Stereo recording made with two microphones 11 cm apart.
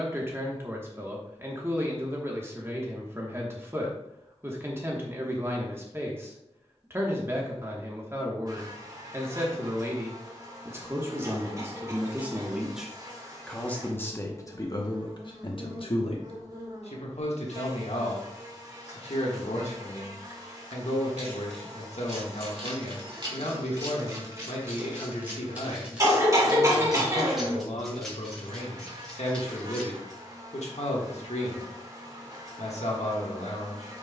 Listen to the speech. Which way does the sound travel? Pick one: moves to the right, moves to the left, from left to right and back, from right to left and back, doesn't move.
moves to the left.